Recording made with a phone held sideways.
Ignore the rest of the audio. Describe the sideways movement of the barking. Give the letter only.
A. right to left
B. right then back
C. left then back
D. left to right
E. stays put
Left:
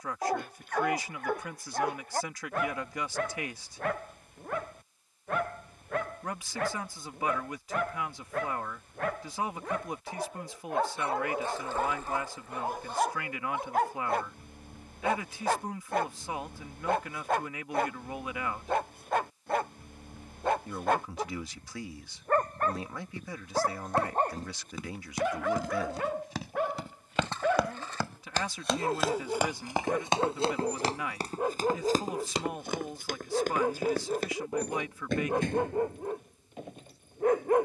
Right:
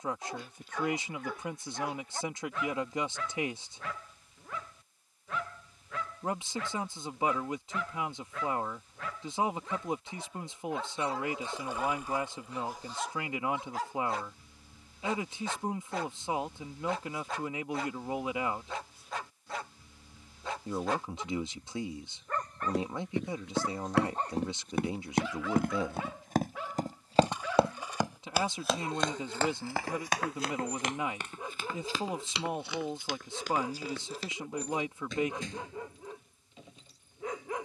E.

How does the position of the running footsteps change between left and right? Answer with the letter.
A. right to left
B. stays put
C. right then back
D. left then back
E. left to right
A.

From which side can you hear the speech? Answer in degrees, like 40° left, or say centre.
20° right.